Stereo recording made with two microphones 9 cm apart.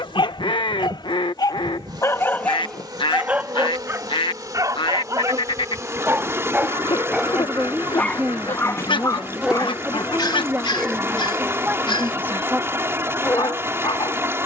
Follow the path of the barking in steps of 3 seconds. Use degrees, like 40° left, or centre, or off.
50° left, 30° right, centre, 60° left, 80° left.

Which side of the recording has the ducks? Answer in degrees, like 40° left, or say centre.
70° left.